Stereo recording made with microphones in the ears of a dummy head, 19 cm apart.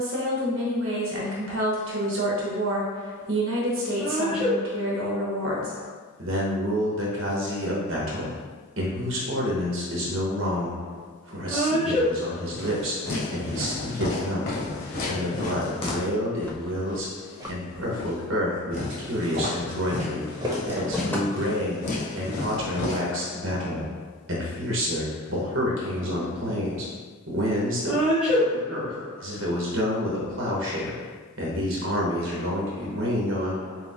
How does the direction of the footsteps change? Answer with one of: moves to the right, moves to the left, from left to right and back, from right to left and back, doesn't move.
from left to right and back.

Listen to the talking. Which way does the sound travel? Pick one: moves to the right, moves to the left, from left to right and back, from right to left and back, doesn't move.
doesn't move.